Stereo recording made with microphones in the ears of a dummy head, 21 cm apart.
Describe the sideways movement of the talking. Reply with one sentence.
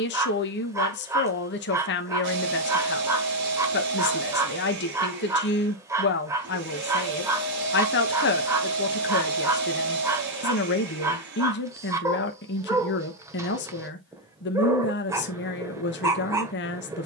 In this clip you hear the talking stay in one place.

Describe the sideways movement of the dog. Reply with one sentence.
In this clip you hear the dog stay in one place.